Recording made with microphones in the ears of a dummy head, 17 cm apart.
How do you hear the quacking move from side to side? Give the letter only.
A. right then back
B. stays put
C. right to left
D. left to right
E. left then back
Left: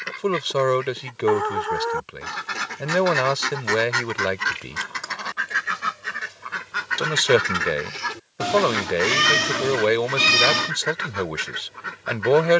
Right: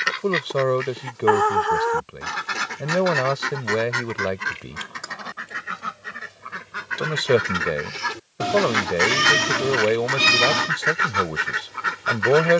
E.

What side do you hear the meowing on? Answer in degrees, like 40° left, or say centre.
20° left.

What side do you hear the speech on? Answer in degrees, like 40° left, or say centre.
50° left.